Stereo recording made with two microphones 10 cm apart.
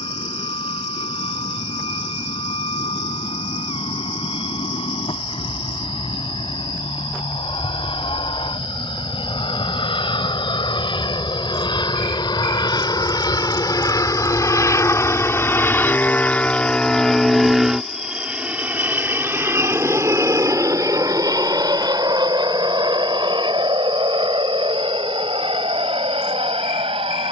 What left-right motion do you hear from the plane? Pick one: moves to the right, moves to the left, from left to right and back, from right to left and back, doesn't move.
moves to the right.